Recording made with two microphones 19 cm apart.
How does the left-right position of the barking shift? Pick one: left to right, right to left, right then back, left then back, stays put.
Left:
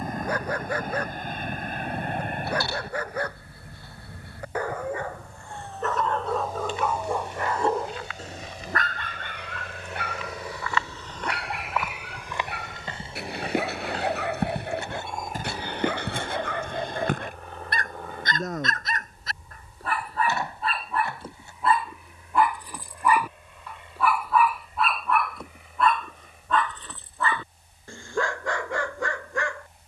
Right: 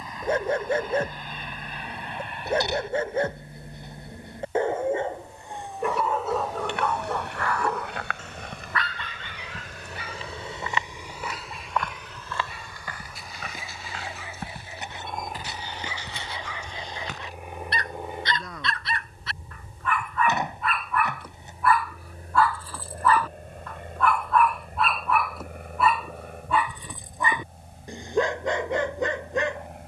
left then back.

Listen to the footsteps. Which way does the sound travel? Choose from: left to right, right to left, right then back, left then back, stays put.
right to left.